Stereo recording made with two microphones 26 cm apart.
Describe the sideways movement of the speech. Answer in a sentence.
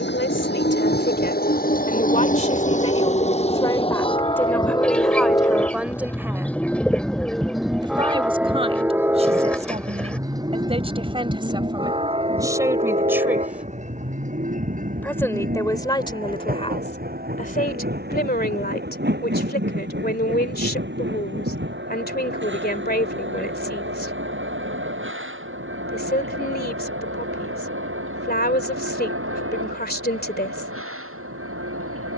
In this clip you hear the speech move from left to right and back again.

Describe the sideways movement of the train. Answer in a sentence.
You can hear the train go from the left side to the right.